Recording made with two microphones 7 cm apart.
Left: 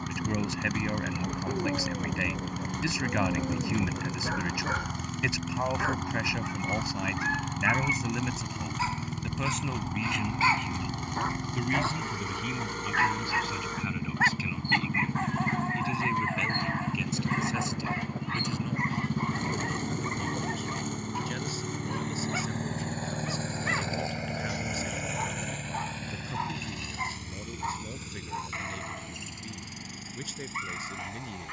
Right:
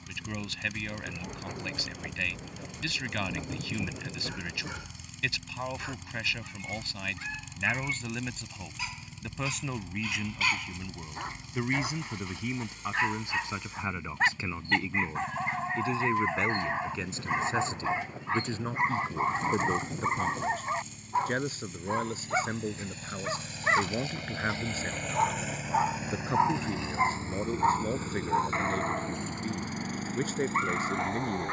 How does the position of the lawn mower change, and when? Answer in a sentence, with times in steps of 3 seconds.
You can hear the lawn mower on the left from 0 s, in the centre from 24 s and on the right from 27 s.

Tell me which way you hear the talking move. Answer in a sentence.
In this clip you hear the talking move from left to right.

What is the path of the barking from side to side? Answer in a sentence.
You can hear the barking go from the left side to the right.